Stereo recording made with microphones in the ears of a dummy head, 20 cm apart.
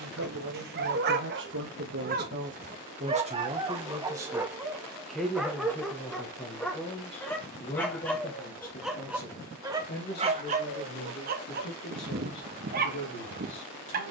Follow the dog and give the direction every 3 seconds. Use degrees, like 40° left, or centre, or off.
40° right, 10° right, centre, 30° right, 40° right.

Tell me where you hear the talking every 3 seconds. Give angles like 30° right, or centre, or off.
50° right, 10° right, 30° left, 40° left, 50° left.